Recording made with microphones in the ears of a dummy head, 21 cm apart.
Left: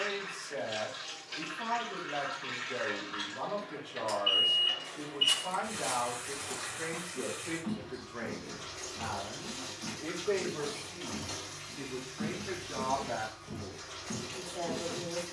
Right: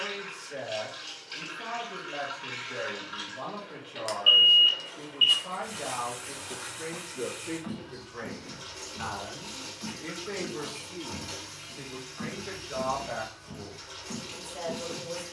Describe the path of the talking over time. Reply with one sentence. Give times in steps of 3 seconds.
You can hear the talking on the left from 0 s, in the centre from 6 s and on the right from 9 s.